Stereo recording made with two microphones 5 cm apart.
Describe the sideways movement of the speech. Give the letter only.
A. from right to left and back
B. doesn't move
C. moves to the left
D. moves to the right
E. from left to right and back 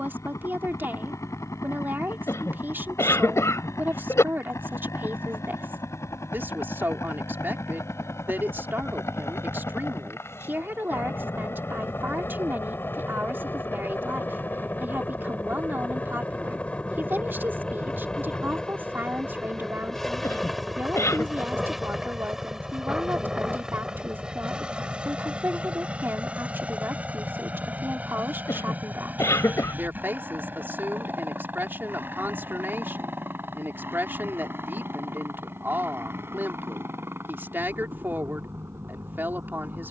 B.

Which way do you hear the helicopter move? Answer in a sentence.
You can hear the helicopter move from left to right.